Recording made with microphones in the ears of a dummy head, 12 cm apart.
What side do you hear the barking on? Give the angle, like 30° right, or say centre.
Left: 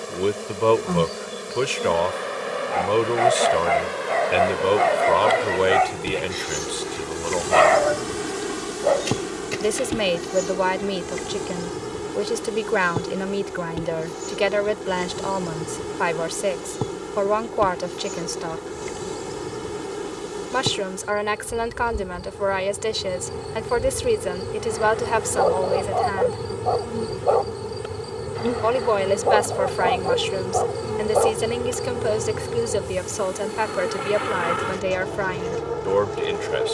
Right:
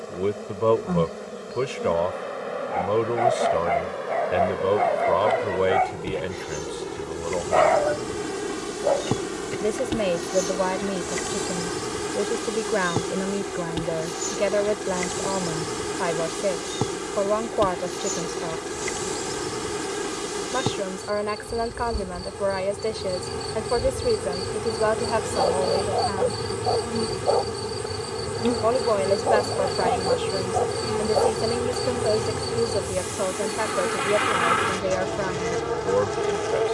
70° left.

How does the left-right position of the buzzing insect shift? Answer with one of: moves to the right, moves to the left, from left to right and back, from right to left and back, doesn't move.
moves to the right.